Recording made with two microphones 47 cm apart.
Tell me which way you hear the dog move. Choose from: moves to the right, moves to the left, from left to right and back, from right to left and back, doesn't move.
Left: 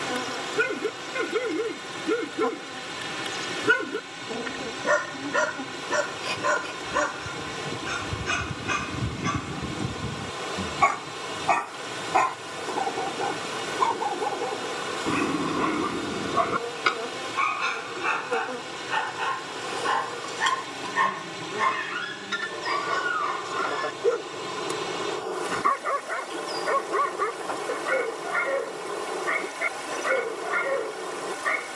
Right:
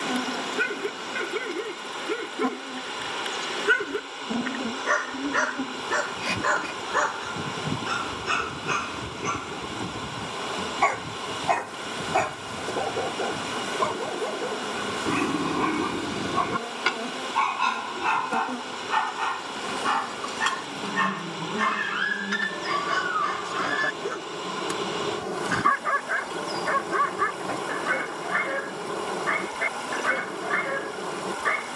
moves to the right.